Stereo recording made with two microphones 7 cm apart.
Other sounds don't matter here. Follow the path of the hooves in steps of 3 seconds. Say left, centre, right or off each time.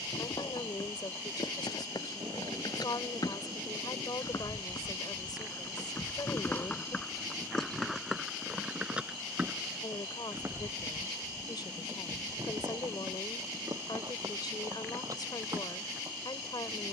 left, left, centre, right, right, right.